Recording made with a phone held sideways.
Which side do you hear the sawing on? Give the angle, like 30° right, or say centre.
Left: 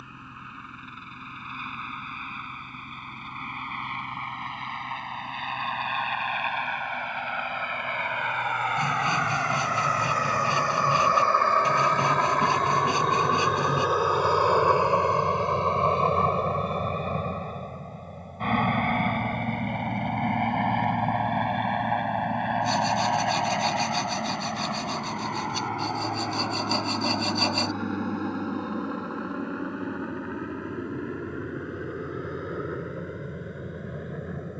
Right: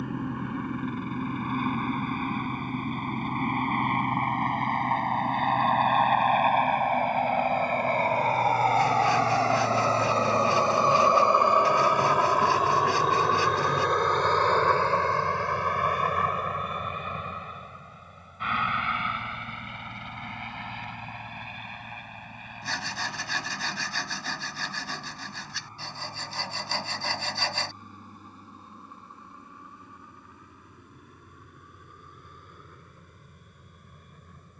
20° left.